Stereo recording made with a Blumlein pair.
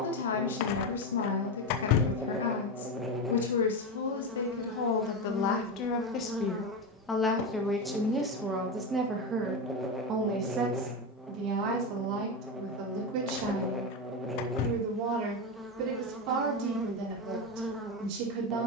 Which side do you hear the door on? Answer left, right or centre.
left.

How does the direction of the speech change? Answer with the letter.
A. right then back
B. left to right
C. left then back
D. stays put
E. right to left
B.